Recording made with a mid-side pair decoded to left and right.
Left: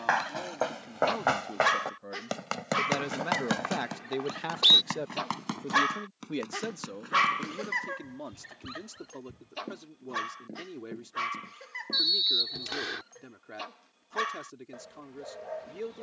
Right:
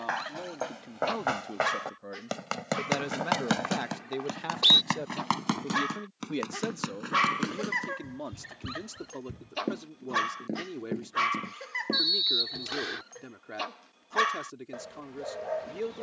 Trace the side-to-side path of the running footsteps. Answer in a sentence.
You can hear the running footsteps move from left to right.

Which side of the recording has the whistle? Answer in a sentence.
You can hear the whistle in the centre.